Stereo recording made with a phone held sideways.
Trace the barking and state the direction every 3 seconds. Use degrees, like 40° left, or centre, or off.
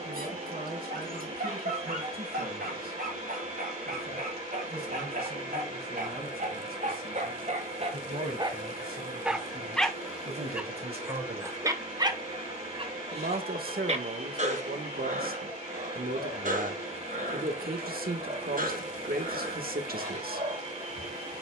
70° right, 70° right, 50° right, 10° right, 40° right, 60° right, 60° right.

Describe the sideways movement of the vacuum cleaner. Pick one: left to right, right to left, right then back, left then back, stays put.
stays put.